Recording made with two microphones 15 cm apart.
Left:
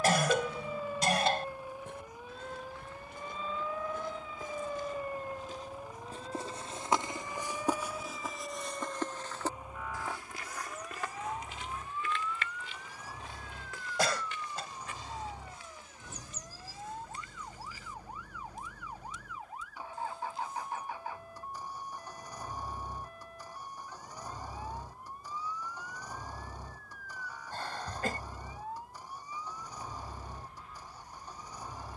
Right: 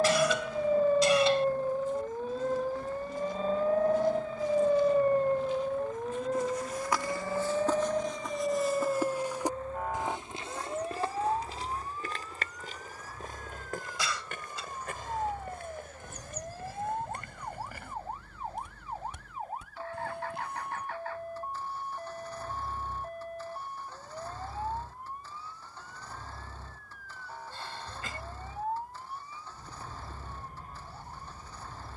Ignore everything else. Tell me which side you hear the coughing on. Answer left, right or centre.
left.